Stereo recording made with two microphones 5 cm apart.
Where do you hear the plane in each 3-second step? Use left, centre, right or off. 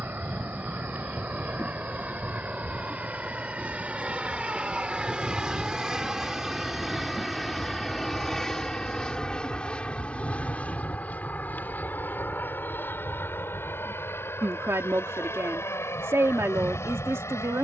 right, right, centre, left, left, left.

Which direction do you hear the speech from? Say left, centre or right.
right.